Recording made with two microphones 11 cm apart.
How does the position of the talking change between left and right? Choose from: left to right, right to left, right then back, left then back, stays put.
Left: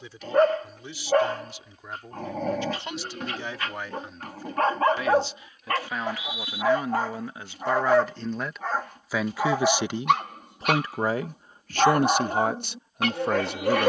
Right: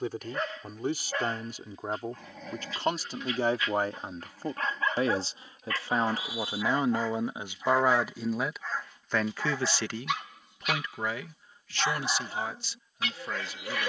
right to left.